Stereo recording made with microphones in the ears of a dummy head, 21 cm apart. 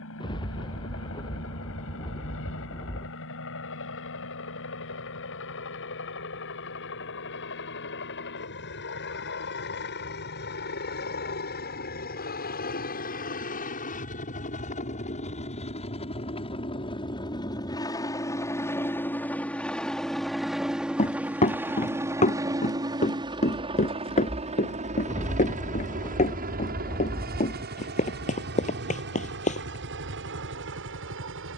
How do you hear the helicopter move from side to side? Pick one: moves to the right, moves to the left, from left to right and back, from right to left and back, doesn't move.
moves to the right.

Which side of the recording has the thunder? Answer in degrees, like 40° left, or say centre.
20° left.